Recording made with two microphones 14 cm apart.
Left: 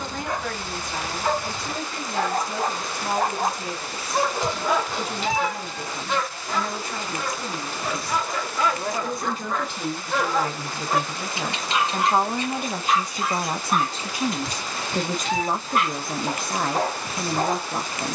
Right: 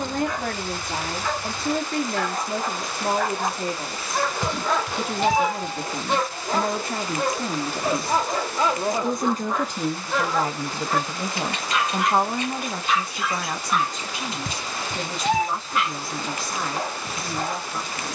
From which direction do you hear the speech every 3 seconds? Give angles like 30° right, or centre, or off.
50° right, 50° right, 50° right, 30° right, 20° left, 50° left.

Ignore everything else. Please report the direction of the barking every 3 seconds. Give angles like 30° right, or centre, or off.
50° left, 10° left, 30° right, 10° left, 40° left, 50° left.